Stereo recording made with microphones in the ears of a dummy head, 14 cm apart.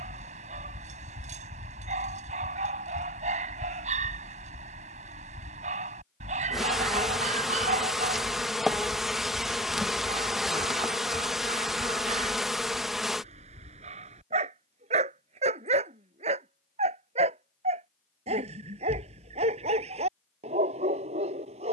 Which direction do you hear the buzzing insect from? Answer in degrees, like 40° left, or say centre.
centre.